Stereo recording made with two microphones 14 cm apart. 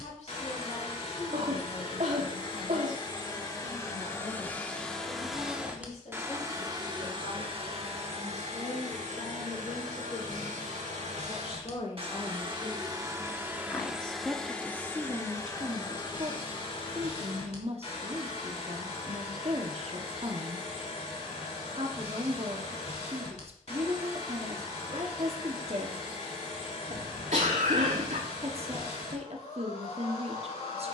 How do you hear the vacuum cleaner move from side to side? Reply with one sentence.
You can hear the vacuum cleaner go right and come back.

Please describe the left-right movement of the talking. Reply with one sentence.
You can hear the talking travel towards the right.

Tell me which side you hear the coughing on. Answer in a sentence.
You can hear the coughing on the right.